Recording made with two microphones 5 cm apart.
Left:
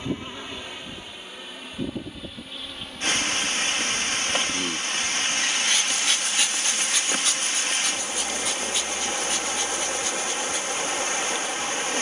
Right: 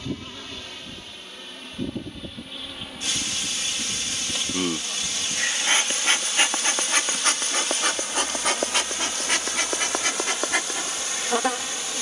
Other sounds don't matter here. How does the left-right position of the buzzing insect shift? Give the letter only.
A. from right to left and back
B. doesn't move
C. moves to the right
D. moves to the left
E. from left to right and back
C.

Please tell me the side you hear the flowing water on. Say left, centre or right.
left.